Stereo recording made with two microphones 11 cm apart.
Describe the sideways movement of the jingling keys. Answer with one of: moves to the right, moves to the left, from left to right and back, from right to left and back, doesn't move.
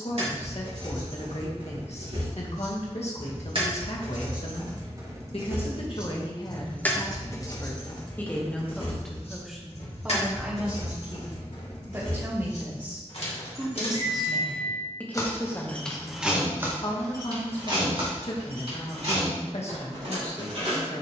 from right to left and back.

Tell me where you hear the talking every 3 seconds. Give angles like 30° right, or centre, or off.
60° left, 60° left, 30° left, 10° right, 10° right, 40° left, 60° left.